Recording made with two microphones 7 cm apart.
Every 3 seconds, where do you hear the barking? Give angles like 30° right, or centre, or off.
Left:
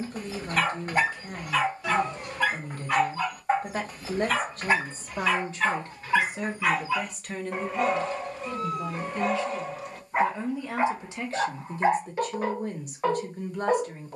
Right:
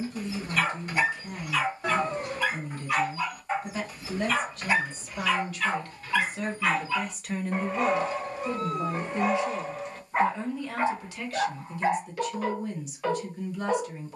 40° left, 40° left, centre, 10° left, 40° left.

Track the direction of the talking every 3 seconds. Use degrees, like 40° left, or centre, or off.
50° left, 40° left, 10° right, 10° left, 40° left.